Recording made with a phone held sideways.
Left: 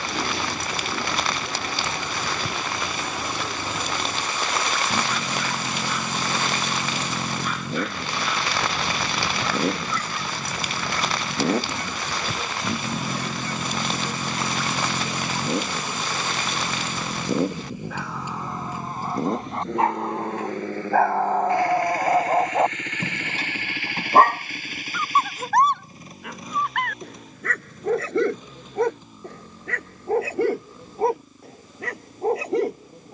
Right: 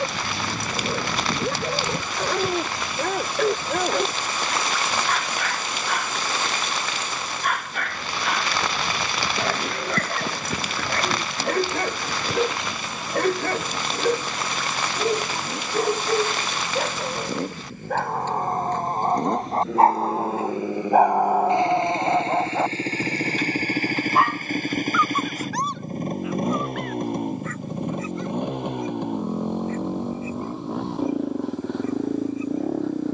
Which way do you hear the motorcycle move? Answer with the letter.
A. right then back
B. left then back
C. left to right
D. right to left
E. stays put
C.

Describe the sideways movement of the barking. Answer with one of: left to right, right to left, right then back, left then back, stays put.
right to left.